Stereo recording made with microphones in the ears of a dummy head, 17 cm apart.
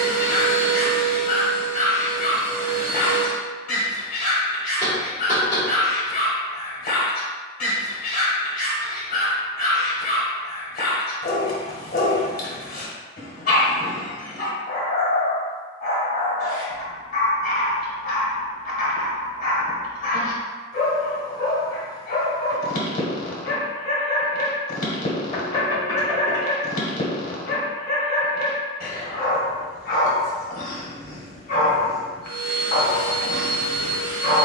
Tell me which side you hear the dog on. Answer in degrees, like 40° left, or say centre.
50° left.